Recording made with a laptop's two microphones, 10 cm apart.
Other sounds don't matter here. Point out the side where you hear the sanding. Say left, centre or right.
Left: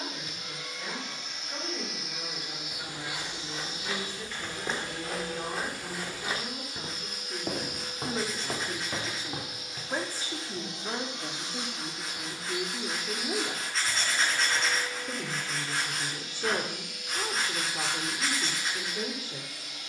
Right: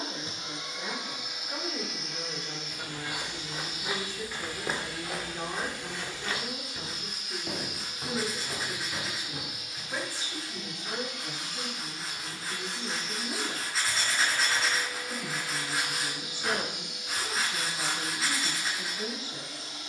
centre.